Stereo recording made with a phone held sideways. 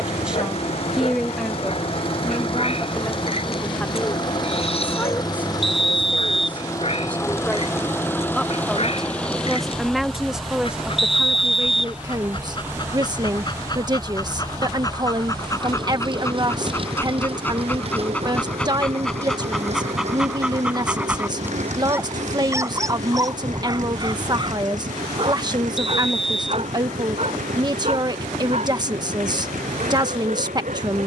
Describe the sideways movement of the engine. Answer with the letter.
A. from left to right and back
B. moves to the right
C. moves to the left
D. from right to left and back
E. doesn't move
B.